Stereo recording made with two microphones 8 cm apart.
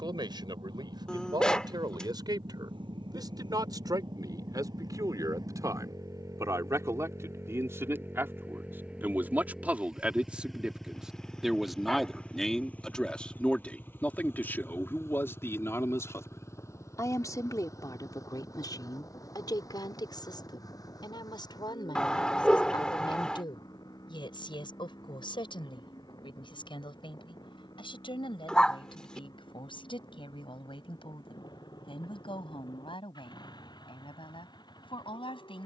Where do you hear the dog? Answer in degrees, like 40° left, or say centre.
10° left.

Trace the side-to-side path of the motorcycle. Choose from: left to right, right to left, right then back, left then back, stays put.
right to left.